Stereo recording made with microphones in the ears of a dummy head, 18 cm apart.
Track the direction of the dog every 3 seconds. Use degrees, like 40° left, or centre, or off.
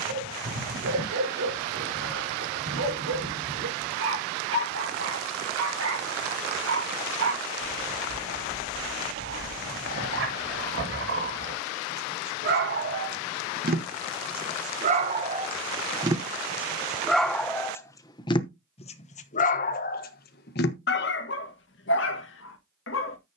70° right, 70° right, 70° right, 60° right, 50° right, 10° right, 40° left, 60° left.